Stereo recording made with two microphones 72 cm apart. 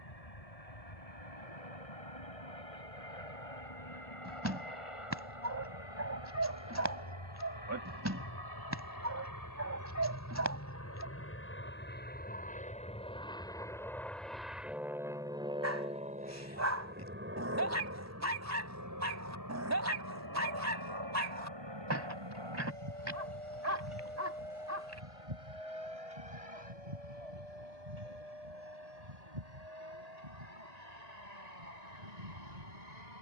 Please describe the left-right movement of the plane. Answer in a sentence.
You can hear the plane travel towards the right.